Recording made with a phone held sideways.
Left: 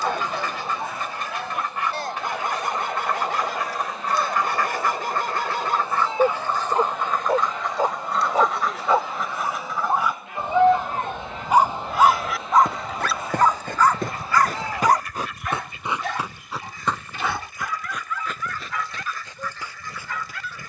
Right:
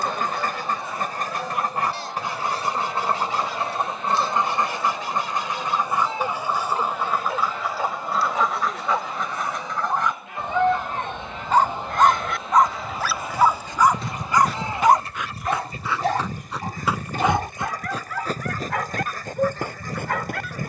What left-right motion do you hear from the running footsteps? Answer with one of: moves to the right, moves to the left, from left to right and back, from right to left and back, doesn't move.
moves to the right.